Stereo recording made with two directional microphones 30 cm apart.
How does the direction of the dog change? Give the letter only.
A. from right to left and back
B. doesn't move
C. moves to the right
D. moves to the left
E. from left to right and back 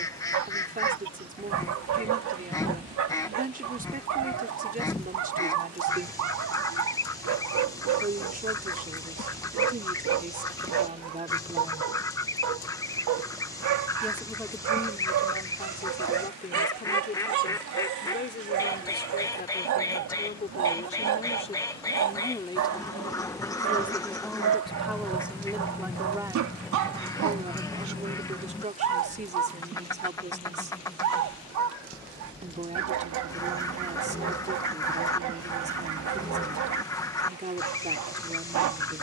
B.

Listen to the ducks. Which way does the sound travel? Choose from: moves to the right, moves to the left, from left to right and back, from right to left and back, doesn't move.
doesn't move.